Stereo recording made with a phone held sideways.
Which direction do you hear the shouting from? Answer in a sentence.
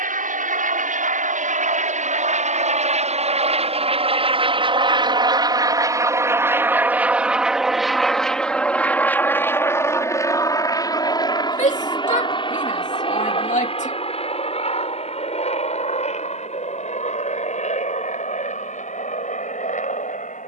You can hear the shouting on the left.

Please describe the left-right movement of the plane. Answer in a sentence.
In this clip you hear the plane move from right to left.